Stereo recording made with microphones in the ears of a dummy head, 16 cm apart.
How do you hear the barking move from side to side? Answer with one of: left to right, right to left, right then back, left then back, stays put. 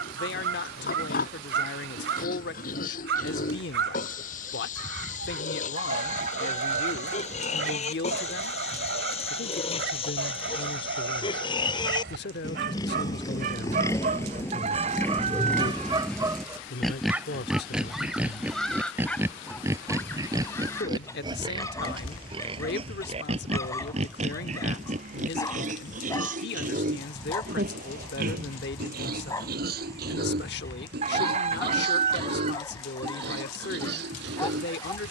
right to left.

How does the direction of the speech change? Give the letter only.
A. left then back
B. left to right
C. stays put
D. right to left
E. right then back
C.